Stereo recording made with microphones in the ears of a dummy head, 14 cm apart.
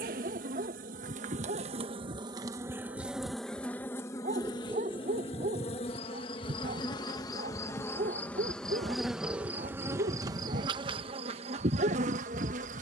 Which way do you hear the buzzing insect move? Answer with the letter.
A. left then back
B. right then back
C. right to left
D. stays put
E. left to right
A.